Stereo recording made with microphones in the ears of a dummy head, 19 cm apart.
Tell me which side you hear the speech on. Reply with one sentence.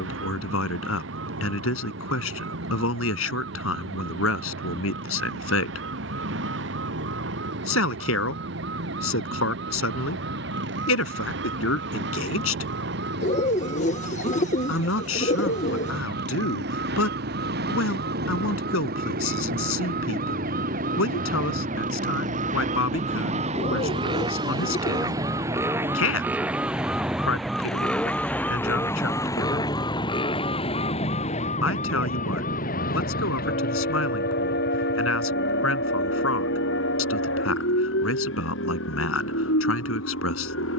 In this clip you hear the speech on the left.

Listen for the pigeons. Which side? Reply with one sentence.
In this clip you hear the pigeons on the left.